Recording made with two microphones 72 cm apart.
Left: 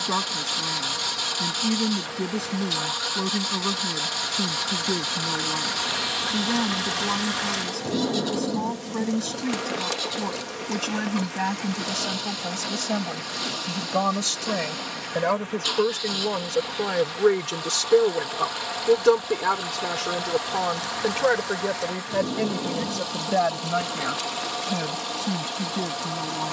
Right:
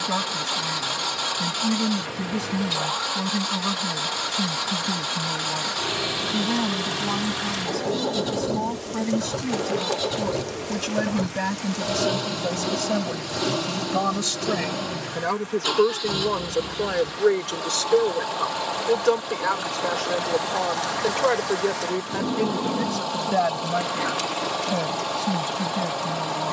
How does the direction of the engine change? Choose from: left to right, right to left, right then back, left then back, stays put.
stays put.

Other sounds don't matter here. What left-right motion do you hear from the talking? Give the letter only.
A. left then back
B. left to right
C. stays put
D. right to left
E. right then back
A.